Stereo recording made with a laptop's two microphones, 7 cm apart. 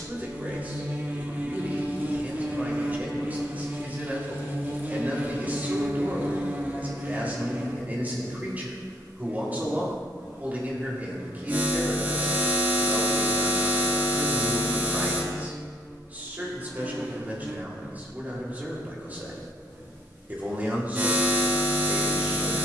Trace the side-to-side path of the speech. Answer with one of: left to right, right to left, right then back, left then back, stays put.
stays put.